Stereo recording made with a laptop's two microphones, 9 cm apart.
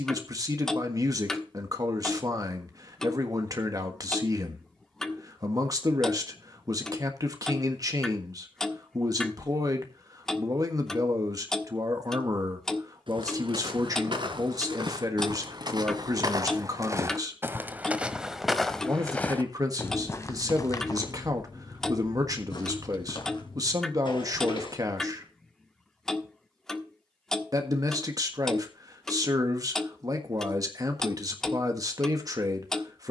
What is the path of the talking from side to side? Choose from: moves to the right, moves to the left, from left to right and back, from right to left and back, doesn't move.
doesn't move.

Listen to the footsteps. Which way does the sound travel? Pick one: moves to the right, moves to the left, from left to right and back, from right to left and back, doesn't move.
moves to the left.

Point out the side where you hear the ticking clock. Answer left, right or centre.
centre.